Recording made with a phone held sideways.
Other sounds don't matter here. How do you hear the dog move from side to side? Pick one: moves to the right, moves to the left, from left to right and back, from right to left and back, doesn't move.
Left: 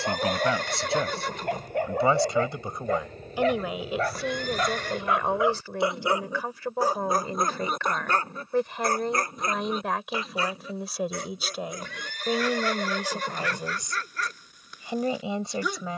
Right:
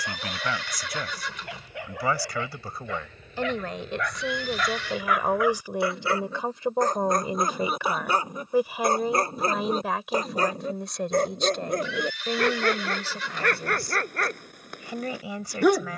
moves to the right.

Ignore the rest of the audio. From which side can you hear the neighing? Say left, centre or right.
left.